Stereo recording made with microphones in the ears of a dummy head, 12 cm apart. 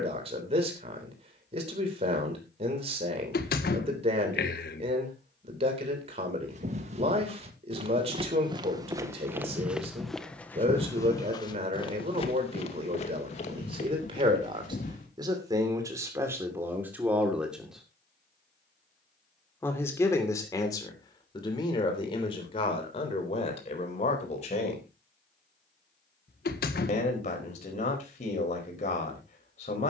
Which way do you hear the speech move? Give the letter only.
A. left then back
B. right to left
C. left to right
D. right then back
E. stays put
B.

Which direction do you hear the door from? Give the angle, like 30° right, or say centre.
70° left.